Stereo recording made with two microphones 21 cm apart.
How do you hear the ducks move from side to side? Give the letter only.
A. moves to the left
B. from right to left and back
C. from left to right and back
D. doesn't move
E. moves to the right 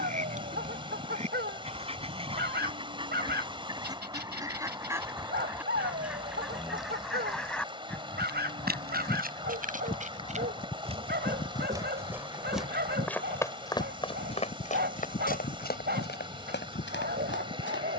A.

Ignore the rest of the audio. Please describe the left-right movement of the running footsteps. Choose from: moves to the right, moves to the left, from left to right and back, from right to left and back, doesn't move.
moves to the left.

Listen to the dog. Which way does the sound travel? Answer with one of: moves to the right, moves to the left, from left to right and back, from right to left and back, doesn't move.
doesn't move.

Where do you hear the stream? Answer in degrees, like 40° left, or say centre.
20° right.